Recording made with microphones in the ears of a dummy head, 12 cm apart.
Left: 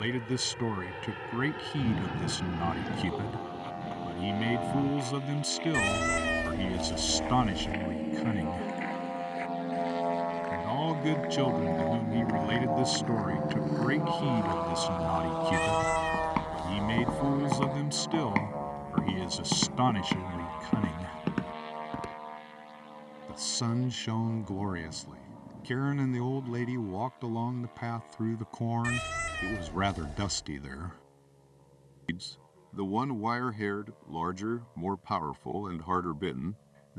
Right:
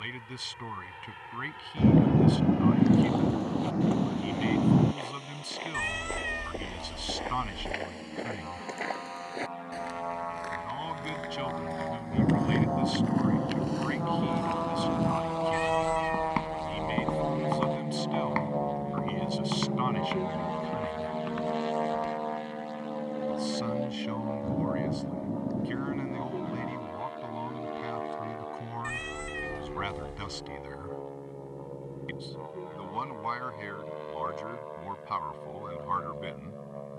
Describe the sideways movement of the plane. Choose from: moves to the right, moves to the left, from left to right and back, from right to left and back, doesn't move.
moves to the right.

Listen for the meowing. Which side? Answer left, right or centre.
left.